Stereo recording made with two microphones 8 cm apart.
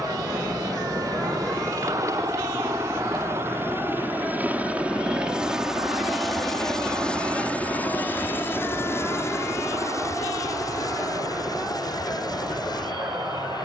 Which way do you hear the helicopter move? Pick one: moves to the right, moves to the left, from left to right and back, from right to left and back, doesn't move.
moves to the left.